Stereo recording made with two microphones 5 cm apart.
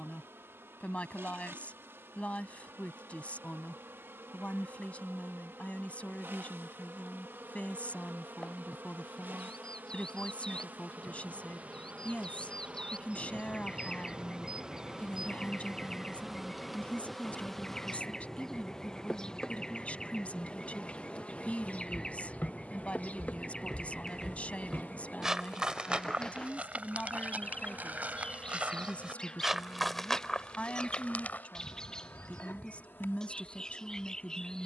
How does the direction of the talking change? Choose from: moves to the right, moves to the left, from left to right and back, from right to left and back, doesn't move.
doesn't move.